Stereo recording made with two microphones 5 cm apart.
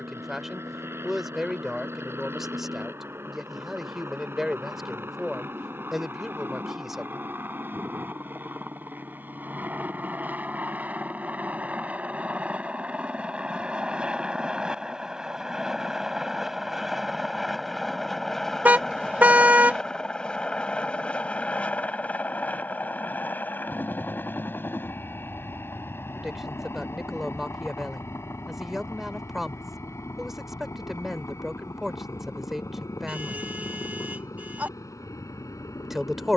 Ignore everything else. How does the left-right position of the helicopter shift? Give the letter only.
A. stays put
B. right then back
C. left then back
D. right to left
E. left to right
D.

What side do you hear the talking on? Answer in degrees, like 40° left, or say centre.
centre.